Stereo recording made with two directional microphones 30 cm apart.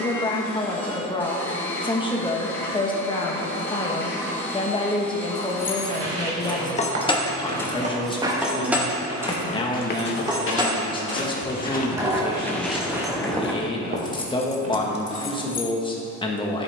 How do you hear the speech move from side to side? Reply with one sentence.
In this clip you hear the speech stay put.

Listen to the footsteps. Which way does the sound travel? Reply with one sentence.
You can hear the footsteps go left and come back.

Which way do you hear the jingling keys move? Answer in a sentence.
You can hear the jingling keys go right and come back.